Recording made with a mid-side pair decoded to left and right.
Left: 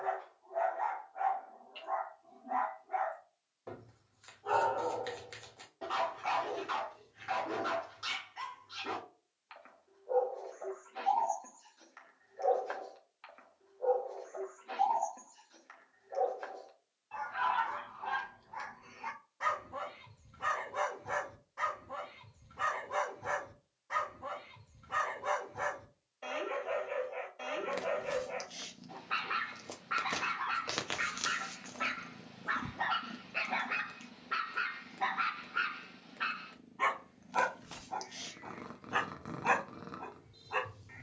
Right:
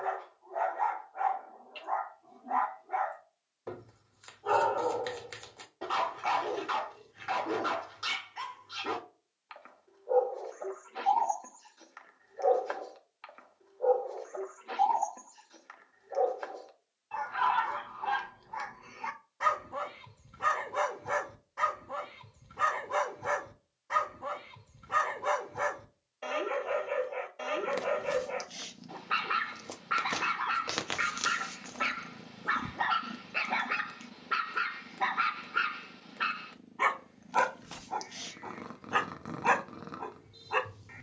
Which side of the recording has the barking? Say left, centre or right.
right.